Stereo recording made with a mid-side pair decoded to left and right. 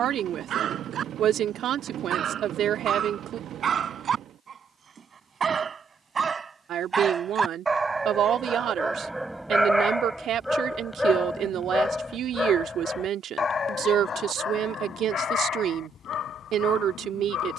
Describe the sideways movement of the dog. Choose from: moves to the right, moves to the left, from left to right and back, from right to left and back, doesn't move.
moves to the left.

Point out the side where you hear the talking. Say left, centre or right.
right.